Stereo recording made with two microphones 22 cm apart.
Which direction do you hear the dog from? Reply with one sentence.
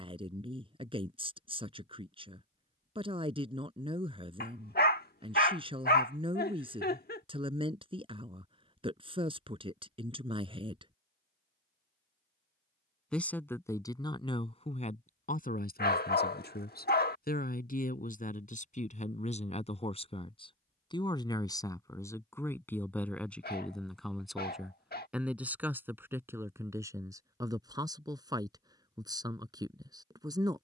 In this clip you hear the dog on the left.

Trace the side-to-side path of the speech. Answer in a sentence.
You can hear the speech move from right to left and back again.